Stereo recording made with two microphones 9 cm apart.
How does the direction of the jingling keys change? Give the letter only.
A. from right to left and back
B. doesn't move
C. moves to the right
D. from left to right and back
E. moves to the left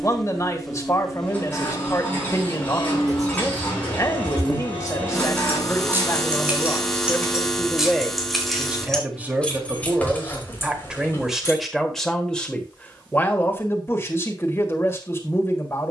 E.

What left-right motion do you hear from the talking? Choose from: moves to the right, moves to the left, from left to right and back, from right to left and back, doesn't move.
from left to right and back.